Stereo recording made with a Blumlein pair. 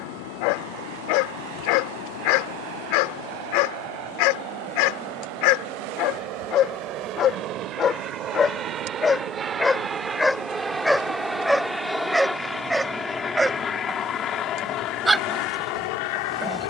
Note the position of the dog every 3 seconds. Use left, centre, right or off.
left, left, left, centre, centre, centre.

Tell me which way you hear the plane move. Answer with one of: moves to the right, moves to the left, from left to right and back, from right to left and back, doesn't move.
moves to the left.